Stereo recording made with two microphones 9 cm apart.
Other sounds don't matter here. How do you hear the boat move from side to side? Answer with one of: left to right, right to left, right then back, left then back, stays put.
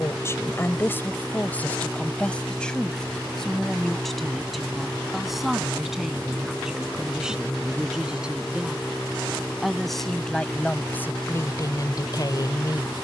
stays put.